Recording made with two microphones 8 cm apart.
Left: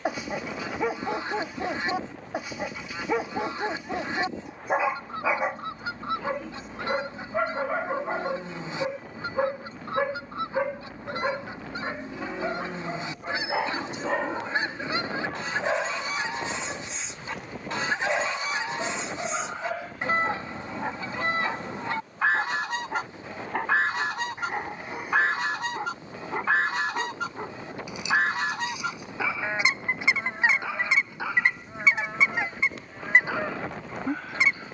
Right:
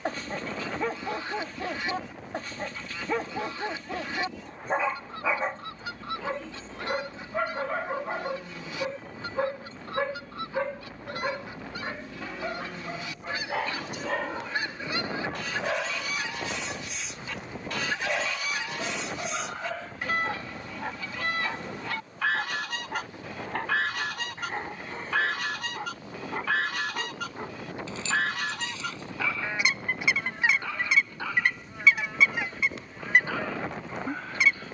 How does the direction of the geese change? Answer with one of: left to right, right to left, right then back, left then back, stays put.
stays put.